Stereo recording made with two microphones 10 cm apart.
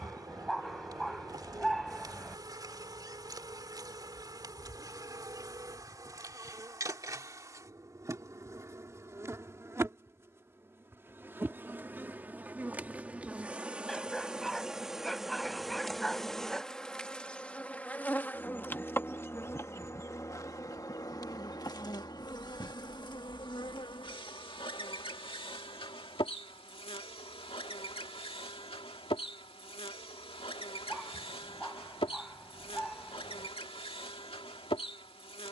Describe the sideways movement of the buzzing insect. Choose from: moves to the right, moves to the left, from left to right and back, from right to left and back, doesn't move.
moves to the left.